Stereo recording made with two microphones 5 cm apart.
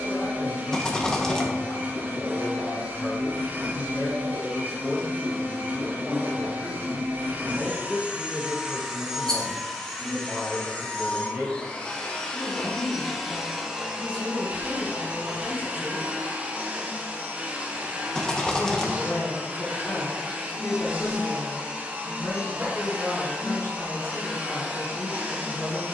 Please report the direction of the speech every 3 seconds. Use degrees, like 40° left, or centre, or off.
70° left, 50° left, centre, 20° right, 10° left, 50° left, 60° left, 60° left, 60° left.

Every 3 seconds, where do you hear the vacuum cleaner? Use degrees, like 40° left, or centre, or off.
40° right, 40° right, 30° right, 10° left, 10° right, 30° right, 30° right, 30° right, 30° right.